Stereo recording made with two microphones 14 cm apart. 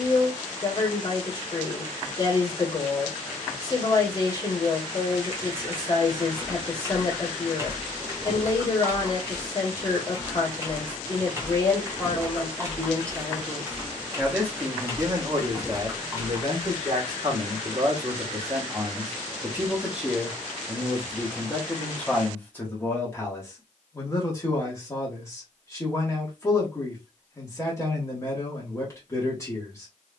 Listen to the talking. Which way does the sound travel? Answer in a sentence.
You can hear the talking go right and come back.